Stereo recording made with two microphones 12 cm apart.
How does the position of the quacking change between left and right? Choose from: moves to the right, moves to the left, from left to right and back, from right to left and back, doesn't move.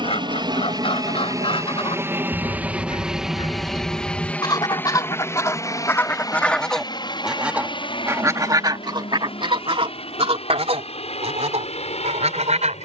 moves to the right.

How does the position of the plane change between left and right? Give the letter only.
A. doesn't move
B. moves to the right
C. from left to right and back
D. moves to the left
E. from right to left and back
D.